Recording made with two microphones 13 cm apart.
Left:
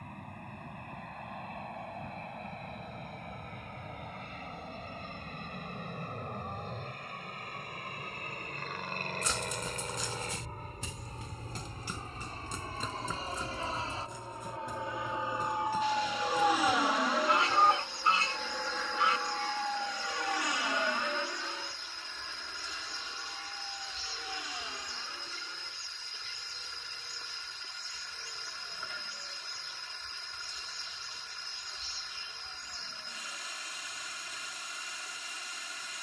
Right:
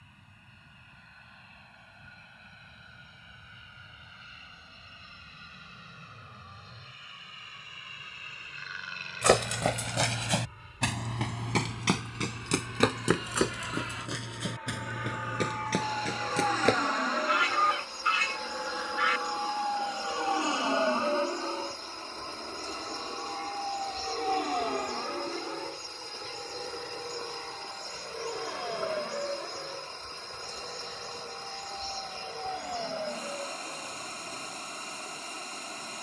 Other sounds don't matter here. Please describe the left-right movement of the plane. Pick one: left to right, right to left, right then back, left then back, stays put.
left to right.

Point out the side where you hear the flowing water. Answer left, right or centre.
right.